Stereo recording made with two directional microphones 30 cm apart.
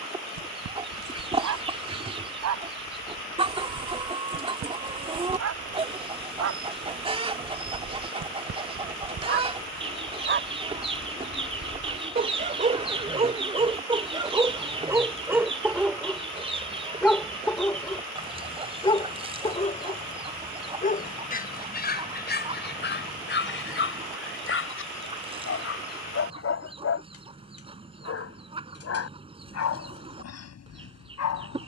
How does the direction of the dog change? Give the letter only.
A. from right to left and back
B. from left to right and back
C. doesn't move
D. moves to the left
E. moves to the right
D.